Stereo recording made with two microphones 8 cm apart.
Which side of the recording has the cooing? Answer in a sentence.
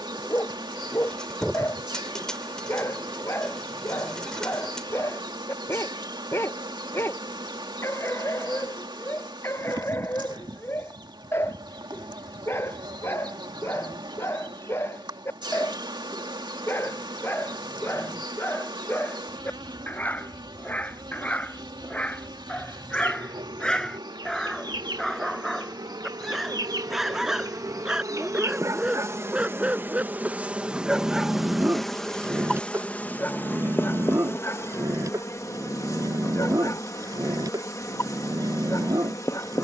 In this clip you hear the cooing in the centre.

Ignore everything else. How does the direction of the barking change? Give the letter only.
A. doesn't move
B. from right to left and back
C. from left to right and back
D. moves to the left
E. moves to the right
E.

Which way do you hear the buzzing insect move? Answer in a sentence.
In this clip you hear the buzzing insect move from right to left.